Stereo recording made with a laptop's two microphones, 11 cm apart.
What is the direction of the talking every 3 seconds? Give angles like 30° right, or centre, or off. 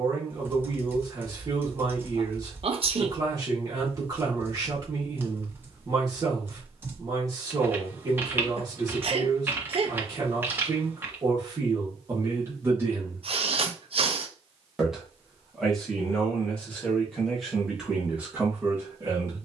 30° right, 30° right, 30° right, 30° right, 20° right, centre, 20° right.